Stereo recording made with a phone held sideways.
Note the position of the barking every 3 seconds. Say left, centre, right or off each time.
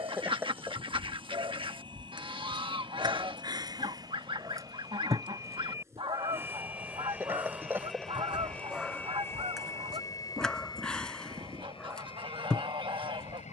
right, right, centre, centre, centre.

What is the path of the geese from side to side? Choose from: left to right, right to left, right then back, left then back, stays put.
stays put.